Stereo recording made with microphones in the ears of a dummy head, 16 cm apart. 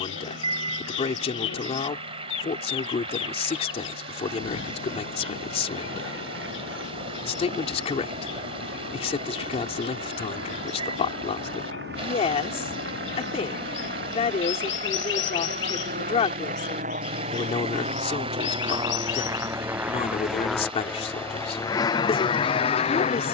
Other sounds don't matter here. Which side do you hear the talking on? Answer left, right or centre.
left.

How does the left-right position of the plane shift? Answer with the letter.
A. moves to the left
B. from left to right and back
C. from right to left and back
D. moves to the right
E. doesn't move
A.